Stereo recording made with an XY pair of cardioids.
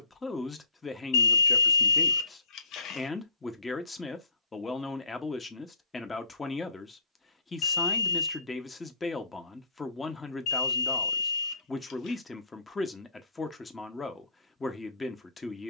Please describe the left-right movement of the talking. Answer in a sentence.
In this clip you hear the talking stay in one place.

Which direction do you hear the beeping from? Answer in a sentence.
In this clip you hear the beeping on the left.